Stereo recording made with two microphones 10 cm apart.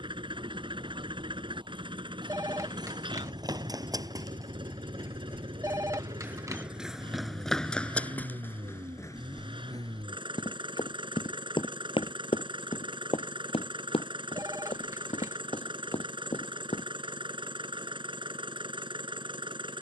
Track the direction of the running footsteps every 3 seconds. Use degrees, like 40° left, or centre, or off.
50° right, 40° right, 10° left, 40° left, 70° left, 80° left, off.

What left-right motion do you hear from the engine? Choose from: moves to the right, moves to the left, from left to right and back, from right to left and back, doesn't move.
doesn't move.